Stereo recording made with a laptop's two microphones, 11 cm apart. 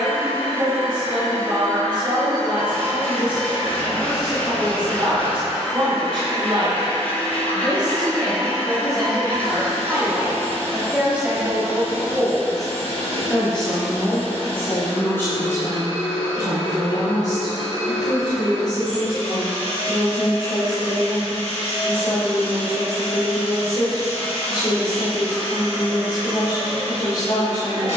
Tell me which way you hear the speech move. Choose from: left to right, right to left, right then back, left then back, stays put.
right to left.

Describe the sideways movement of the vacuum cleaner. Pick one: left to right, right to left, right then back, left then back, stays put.
stays put.